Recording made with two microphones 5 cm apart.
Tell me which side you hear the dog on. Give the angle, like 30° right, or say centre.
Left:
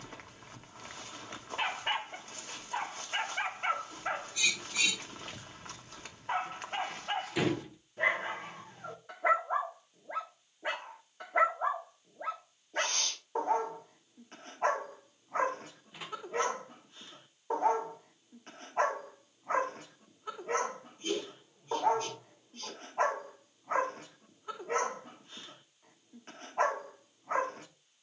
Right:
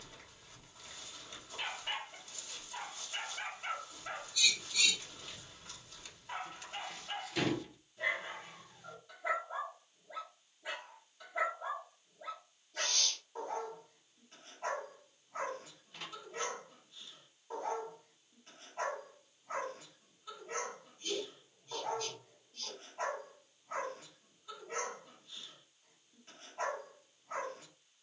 50° left.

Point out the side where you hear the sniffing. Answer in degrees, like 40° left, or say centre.
40° left.